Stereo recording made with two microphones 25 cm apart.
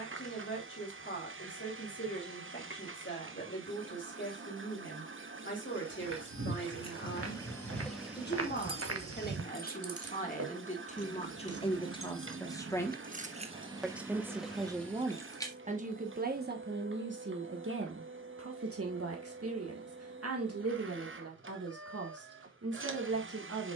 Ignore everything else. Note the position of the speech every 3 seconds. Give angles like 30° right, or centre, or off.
50° left, 50° left, 40° left, 30° left, centre, 40° right, 70° right, 70° right.